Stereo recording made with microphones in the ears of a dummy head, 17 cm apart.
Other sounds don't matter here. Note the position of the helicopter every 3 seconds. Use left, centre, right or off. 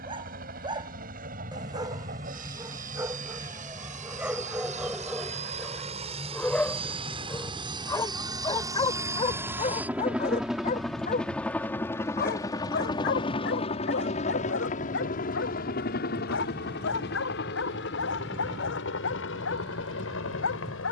right, right, right, centre, left, left, left.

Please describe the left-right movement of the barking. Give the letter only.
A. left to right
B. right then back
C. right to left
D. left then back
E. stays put
C.